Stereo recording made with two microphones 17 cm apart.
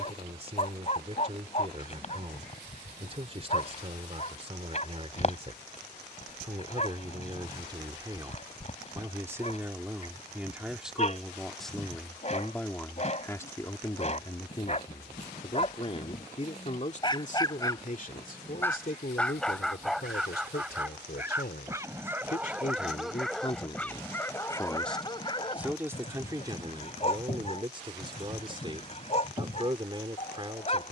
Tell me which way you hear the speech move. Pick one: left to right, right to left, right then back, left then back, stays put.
left then back.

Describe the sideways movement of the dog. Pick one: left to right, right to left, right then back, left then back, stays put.
right then back.